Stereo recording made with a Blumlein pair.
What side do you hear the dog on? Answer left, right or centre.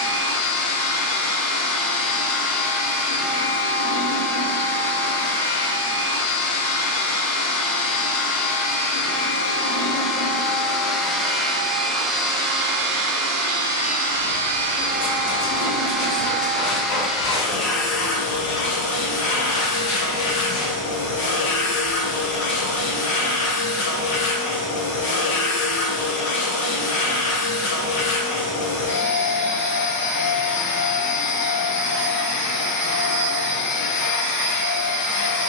left.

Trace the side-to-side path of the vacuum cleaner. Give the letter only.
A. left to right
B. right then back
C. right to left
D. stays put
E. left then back
B.